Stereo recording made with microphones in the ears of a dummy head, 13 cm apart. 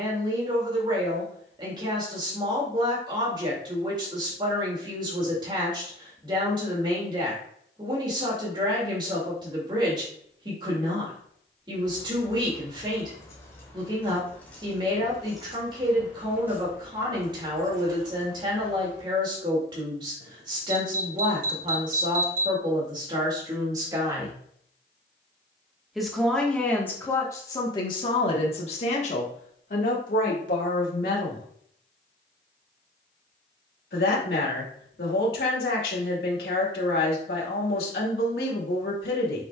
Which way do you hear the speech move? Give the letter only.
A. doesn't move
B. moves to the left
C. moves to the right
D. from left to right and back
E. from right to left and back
B.